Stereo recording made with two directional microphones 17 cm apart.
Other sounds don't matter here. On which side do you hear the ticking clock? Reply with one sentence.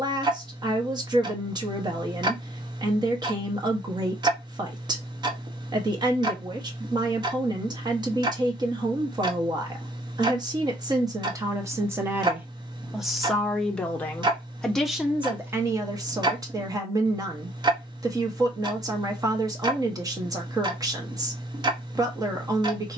You can hear the ticking clock on the right.